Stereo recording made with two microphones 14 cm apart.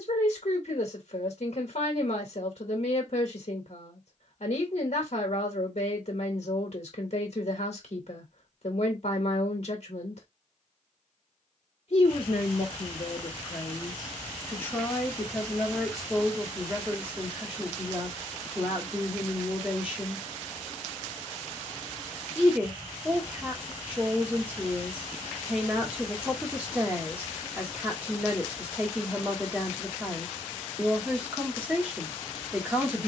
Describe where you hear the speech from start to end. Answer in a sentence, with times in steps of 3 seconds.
In this clip you hear the speech on the left from 0 s and in the centre from 15 s.